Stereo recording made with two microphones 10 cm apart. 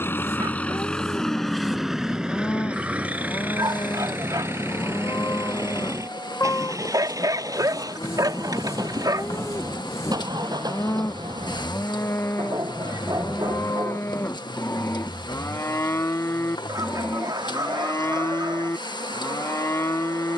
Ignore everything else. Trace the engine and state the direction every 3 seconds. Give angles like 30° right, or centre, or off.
centre, 20° right, 40° right, 40° right, 50° right, 50° right, 50° right.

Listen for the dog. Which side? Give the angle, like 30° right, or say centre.
40° right.